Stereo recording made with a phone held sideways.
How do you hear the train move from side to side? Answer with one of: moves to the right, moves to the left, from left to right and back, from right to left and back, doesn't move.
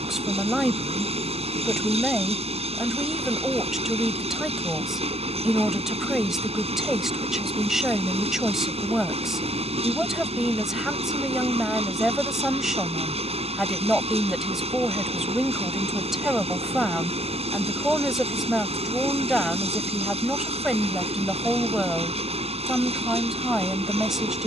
doesn't move.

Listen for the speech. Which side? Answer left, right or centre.
centre.